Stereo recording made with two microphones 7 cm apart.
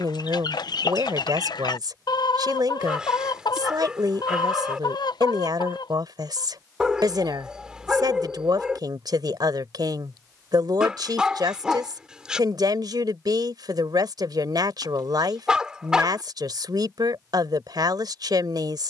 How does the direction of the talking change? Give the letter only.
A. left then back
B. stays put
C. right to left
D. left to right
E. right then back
B.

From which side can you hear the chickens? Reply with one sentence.
In this clip you hear the chickens on the left.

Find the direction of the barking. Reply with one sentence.
You can hear the barking in the centre.